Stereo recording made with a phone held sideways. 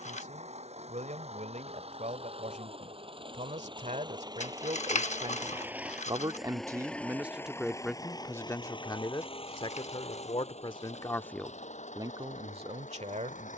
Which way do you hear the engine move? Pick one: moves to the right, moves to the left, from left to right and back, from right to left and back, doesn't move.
moves to the left.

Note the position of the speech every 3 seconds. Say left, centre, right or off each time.
right, right, centre, left, right.